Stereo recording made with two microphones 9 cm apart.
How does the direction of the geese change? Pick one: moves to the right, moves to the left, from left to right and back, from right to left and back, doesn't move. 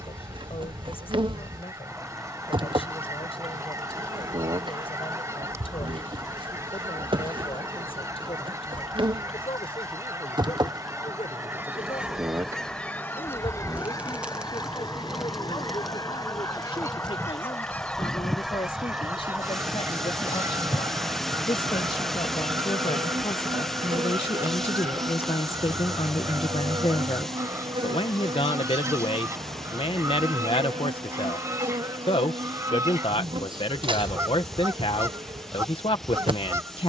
from right to left and back.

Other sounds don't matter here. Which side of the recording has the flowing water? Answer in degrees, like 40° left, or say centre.
centre.